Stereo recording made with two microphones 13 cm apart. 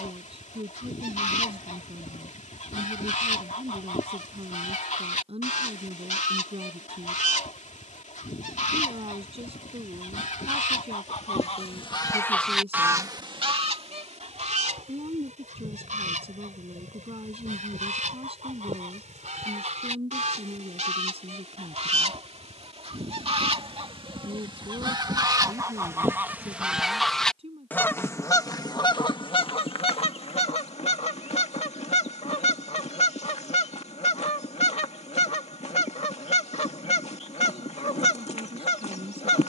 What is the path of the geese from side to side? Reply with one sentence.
In this clip you hear the geese move from left to right and back again.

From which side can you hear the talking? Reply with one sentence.
You can hear the talking on the right.